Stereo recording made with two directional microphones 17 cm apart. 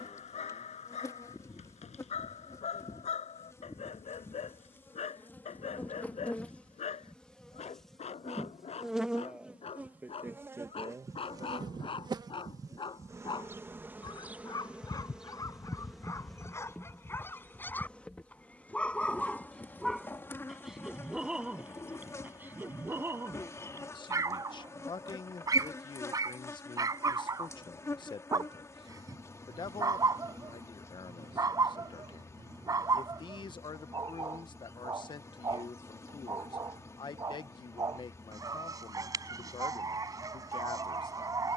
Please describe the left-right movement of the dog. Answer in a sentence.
In this clip you hear the dog go from the left side to the right.